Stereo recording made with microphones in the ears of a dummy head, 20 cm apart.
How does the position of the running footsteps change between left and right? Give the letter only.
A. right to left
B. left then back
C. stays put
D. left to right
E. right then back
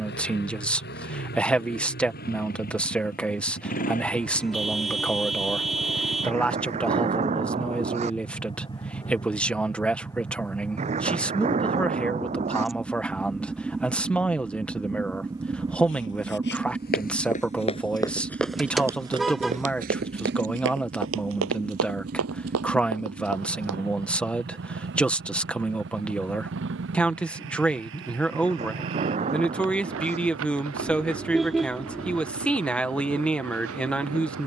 D.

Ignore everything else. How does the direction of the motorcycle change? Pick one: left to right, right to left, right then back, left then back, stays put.
left to right.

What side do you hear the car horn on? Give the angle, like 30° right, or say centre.
centre.